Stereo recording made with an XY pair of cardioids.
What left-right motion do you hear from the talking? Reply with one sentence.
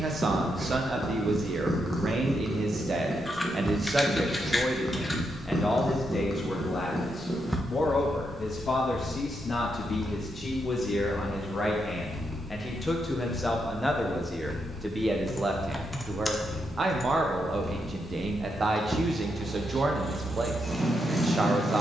In this clip you hear the talking go left and come back.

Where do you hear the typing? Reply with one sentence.
In this clip you hear the typing in the centre.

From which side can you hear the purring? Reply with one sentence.
In this clip you hear the purring in the centre.